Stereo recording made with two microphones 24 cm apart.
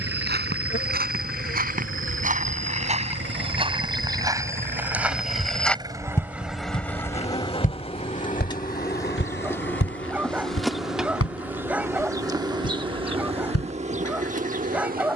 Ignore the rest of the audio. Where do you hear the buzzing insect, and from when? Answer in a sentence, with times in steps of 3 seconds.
In this clip you hear the buzzing insect on the left from 0 s, in the centre from 9 s and on the right from 12 s.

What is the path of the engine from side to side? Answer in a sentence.
You can hear the engine travel towards the left.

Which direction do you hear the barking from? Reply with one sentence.
You can hear the barking in the centre.